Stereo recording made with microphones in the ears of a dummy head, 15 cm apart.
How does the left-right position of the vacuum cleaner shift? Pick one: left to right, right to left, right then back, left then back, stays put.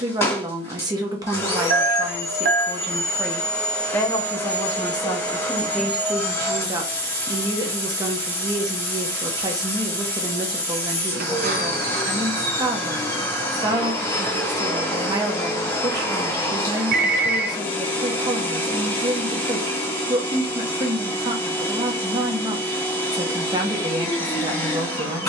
stays put.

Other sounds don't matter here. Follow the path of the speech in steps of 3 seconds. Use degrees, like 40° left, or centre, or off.
20° right, 10° left, 20° right, 20° right, 20° right, 20° right, 20° right, 20° right, 20° right.